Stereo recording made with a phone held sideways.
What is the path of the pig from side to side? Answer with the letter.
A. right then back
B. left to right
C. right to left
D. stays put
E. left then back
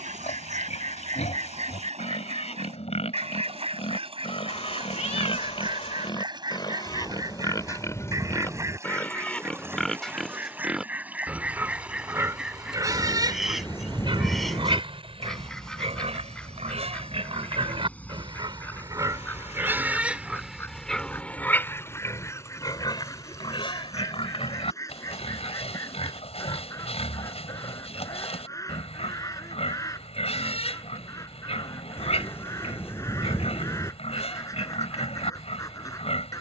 A.